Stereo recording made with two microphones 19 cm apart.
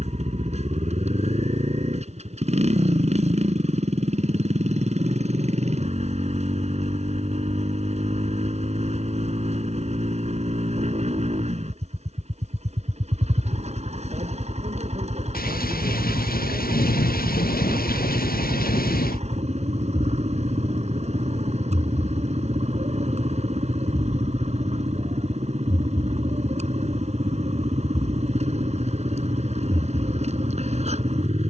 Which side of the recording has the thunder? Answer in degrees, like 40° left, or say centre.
50° left.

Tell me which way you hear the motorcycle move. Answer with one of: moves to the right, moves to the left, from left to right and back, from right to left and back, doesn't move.
doesn't move.